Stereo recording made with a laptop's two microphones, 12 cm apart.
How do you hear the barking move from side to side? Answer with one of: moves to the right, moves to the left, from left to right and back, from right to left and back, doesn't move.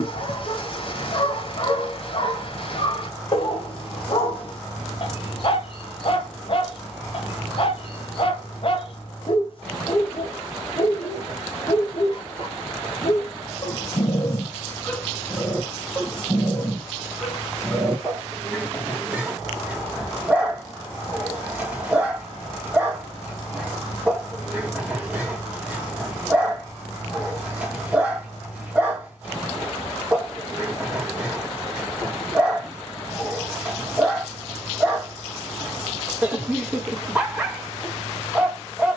moves to the right.